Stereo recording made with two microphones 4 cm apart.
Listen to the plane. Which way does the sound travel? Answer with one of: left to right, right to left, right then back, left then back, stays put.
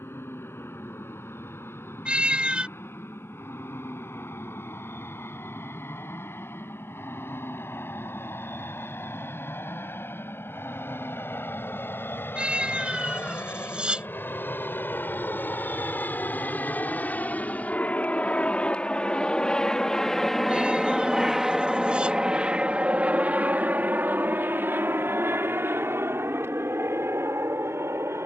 left to right.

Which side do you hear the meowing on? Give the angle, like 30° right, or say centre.
20° right.